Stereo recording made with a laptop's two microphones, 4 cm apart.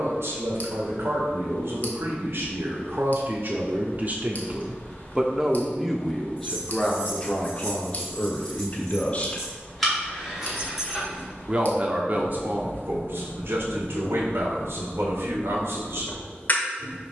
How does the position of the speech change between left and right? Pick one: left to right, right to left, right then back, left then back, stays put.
left then back.